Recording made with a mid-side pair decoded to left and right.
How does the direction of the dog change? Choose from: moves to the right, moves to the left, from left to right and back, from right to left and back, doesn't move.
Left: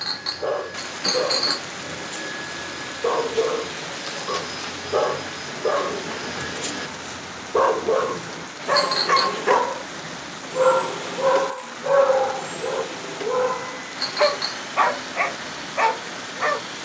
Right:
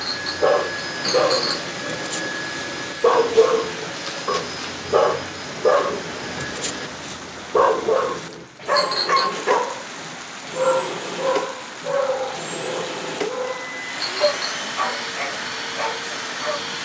moves to the left.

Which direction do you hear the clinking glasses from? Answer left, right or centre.
centre.